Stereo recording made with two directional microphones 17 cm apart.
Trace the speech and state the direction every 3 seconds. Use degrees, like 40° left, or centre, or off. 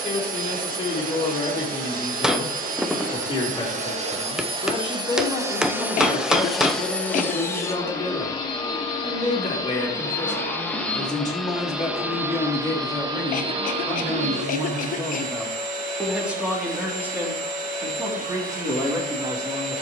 30° left, 30° left, 30° left, 20° left, 10° left, 10° right, 20° right.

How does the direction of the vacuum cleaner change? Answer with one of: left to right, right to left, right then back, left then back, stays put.
left then back.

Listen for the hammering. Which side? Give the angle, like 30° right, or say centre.
centre.